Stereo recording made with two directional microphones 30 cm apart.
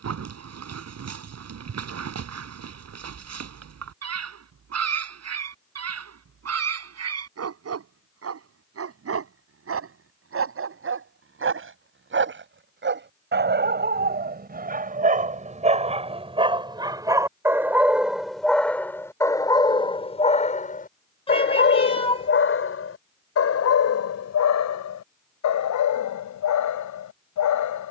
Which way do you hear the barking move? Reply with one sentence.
In this clip you hear the barking go from the right side to the left.